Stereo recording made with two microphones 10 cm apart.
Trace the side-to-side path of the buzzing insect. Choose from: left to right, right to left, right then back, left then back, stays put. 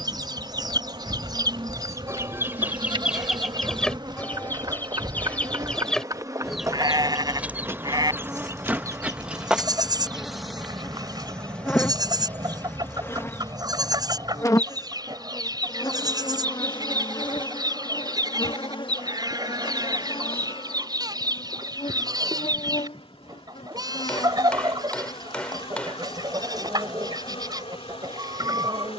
right to left.